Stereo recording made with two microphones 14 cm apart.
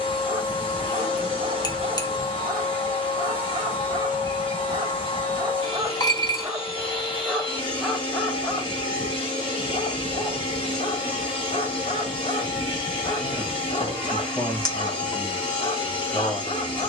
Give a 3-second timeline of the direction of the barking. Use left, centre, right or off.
right, right, centre, left, left, left.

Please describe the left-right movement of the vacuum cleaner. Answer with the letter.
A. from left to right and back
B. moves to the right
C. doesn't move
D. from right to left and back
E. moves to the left
C.